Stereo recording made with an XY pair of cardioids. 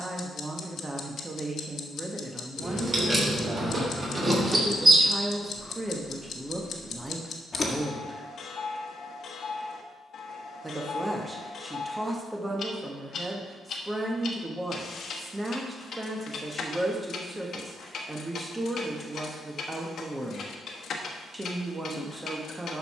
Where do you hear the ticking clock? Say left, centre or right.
left.